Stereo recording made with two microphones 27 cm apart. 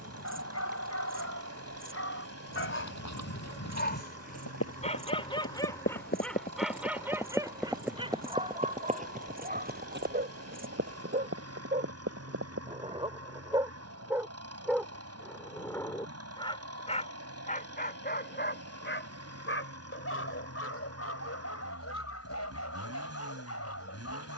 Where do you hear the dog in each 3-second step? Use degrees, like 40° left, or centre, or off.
60° left, 20° left, 10° right, 30° right, 20° right, 20° left, 50° left, 60° left.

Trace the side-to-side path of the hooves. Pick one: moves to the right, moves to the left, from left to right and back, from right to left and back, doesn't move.
moves to the right.